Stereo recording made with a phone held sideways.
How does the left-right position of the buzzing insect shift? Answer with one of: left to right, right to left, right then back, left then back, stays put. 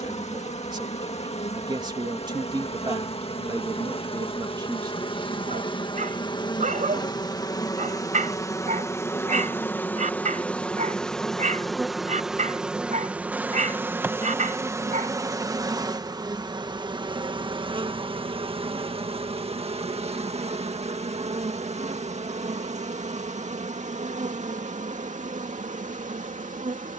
left to right.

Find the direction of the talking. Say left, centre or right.
right.